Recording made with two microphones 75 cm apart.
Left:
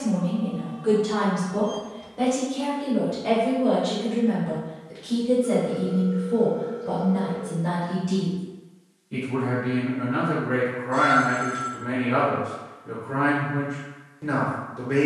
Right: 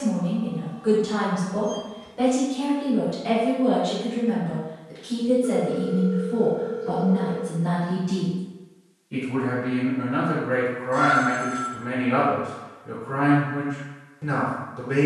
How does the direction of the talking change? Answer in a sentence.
In this clip you hear the talking go left and come back.